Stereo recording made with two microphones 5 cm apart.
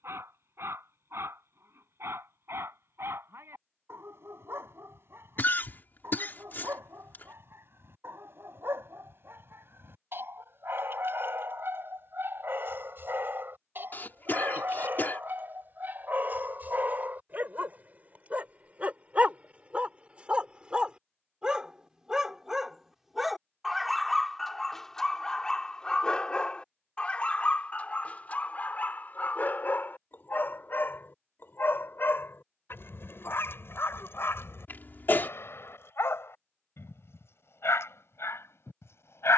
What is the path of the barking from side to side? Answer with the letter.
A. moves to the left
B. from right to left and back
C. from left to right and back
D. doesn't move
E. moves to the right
A.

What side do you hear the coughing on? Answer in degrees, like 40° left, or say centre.
40° left.